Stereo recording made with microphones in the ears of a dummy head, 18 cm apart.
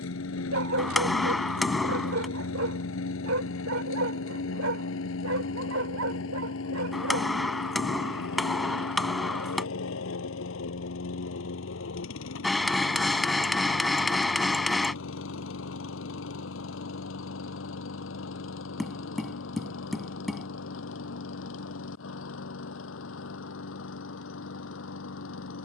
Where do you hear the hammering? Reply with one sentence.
You can hear the hammering in the centre.